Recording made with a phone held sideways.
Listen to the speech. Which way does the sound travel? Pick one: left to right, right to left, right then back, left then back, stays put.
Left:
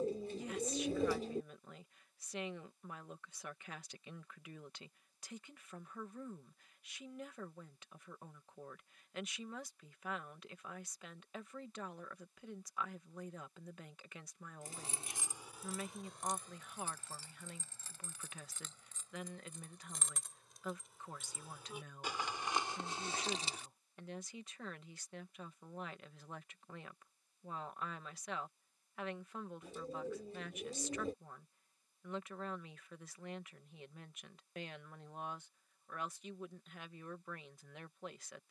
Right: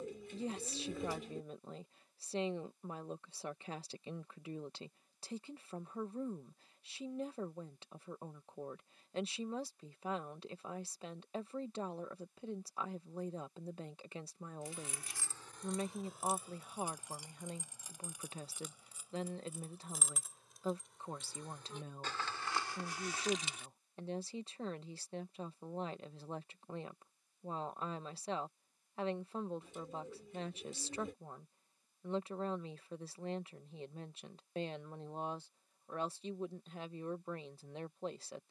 stays put.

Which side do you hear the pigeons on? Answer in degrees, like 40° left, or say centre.
40° left.